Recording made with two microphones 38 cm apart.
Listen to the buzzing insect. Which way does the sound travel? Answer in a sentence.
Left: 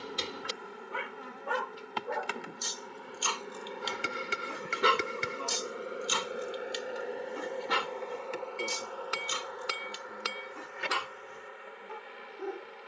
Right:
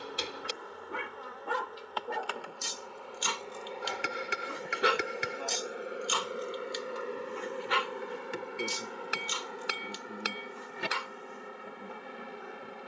In this clip you hear the buzzing insect move from left to right.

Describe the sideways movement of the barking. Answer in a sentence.
You can hear the barking travel towards the left.